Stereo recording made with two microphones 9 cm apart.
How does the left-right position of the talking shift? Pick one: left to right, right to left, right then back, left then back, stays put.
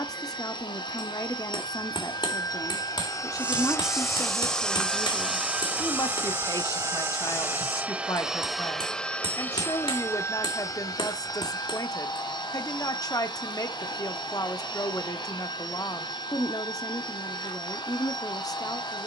stays put.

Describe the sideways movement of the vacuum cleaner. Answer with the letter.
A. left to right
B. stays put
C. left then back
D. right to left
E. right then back
E.